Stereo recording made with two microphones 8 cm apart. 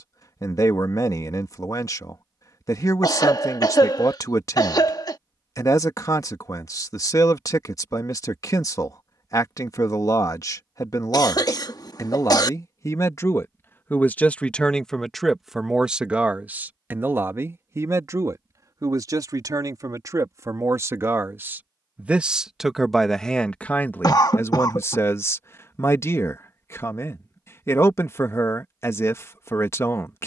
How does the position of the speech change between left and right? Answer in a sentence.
You can hear the speech go right and come back.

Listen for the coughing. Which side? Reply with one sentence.
You can hear the coughing on the left.